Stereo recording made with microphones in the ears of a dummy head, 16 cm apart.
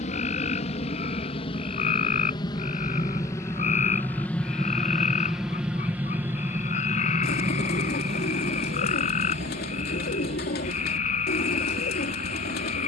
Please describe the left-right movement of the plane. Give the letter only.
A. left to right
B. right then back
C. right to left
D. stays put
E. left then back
A.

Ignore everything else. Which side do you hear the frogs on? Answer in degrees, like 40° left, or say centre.
40° left.